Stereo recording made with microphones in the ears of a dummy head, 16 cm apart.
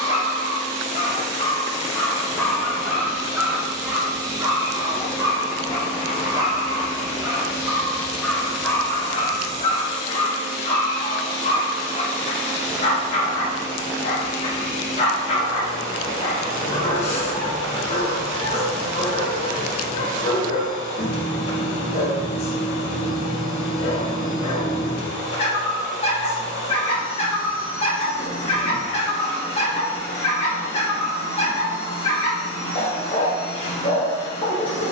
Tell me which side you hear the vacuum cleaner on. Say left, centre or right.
left.